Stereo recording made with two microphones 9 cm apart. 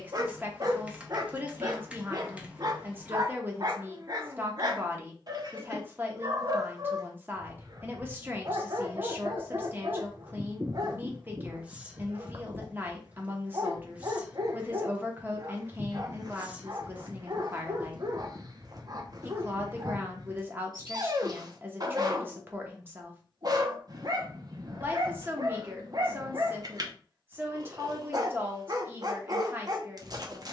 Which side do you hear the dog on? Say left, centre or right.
right.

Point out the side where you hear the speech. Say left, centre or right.
right.